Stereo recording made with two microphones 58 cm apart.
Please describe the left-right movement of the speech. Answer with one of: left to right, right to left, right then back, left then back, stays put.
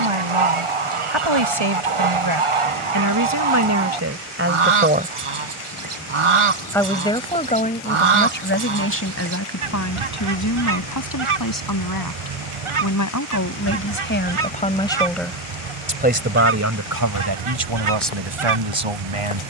left then back.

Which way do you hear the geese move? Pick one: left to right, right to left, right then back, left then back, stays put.
stays put.